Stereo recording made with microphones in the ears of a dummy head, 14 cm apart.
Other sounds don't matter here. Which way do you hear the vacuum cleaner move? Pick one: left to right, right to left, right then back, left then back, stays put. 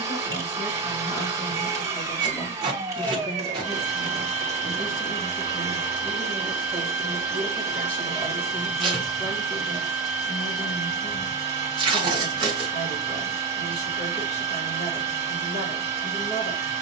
stays put.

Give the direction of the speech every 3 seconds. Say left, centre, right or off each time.
left, centre, centre, left, left, left.